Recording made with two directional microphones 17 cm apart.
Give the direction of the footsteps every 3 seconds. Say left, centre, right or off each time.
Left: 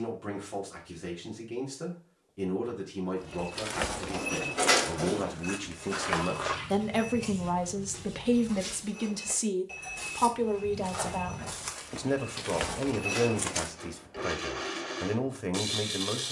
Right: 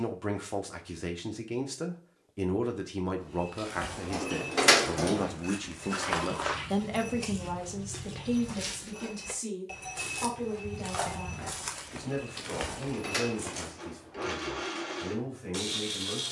off, left, right, right, left, off.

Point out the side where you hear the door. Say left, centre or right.
right.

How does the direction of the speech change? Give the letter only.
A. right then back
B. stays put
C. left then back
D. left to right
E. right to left
E.